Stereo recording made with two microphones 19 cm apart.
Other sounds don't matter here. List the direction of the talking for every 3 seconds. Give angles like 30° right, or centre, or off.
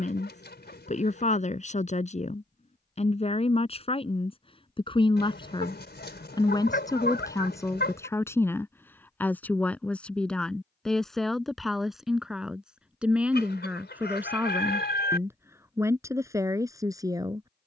40° left, 30° left, 20° left, centre, 10° right, 20° right.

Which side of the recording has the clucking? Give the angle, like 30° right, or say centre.
70° left.